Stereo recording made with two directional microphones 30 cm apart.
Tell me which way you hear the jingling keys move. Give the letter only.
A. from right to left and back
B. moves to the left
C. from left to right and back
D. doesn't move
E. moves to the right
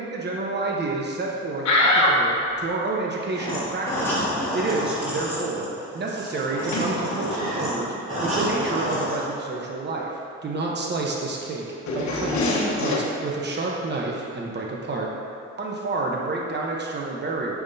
E.